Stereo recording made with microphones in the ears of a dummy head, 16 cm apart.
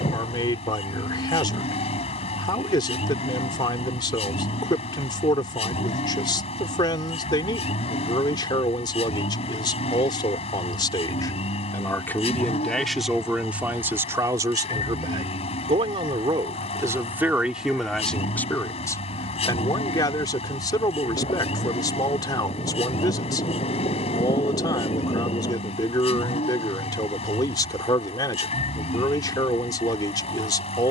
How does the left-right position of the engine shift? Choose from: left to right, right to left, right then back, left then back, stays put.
stays put.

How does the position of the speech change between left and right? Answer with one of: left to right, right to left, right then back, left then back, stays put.
right then back.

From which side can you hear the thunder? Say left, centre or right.
left.